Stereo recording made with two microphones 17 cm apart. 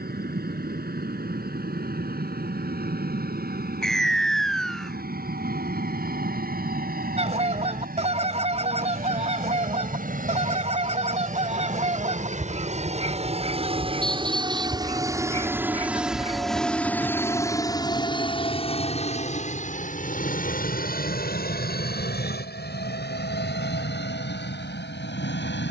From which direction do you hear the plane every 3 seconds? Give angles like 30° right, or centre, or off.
70° right, 70° right, 70° right, 60° right, 40° right, centre, 40° left, 60° left, 70° left.